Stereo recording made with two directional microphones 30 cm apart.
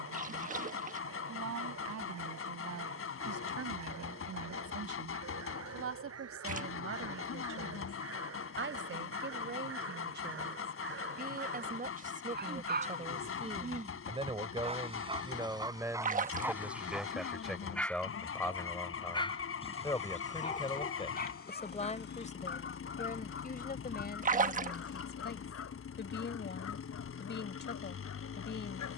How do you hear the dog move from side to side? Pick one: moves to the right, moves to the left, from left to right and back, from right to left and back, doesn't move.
moves to the left.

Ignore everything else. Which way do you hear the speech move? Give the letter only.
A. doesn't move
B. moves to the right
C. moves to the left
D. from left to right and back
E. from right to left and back
C.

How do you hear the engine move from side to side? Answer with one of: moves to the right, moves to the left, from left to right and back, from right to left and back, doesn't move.
doesn't move.